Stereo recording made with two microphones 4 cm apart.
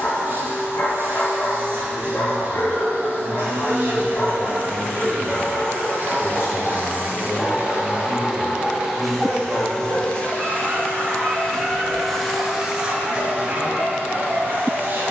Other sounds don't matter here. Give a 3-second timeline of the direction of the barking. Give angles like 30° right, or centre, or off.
50° left, 30° left, centre, 40° right, 60° right.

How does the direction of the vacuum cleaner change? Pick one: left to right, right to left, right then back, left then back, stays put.
left then back.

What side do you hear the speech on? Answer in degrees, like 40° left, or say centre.
60° left.